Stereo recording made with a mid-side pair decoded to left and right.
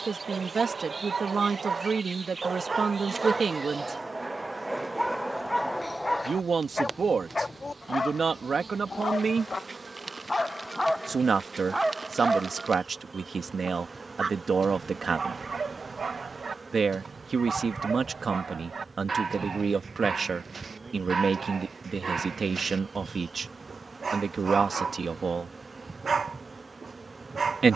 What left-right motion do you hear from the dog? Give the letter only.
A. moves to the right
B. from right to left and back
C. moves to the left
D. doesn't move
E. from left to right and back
B.